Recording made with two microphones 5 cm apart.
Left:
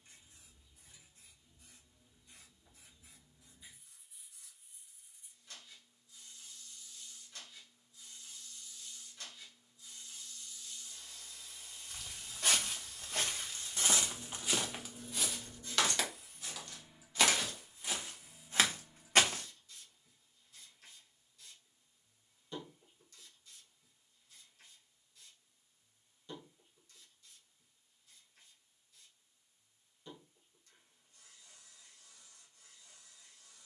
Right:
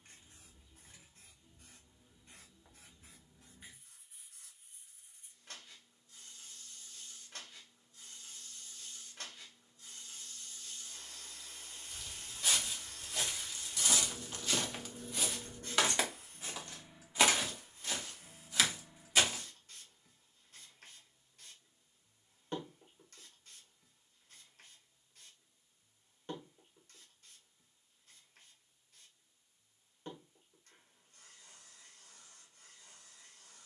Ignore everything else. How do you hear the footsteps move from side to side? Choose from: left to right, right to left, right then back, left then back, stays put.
right then back.